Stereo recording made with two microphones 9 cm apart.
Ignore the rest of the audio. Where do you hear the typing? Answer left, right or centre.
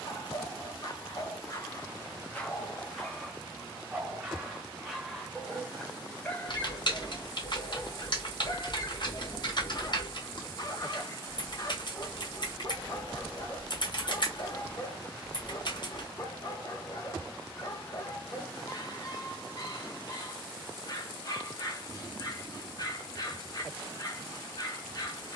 left.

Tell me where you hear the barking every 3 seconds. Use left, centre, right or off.
left, centre, left, left, left, left, left, left, left.